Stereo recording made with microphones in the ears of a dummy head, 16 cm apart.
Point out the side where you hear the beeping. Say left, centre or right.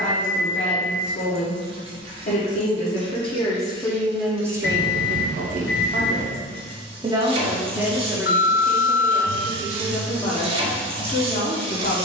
left.